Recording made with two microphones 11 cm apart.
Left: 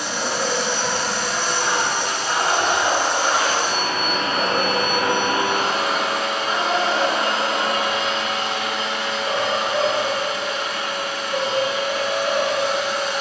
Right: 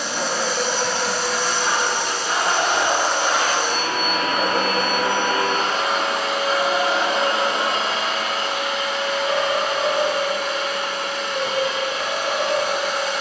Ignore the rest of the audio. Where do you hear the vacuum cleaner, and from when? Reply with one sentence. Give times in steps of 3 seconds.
In this clip you hear the vacuum cleaner on the left from 0 s and on the right from 6 s.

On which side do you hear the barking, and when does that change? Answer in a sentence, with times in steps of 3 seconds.
You can hear the barking on the right from 0 s, in the centre from 3 s and on the left from 6 s.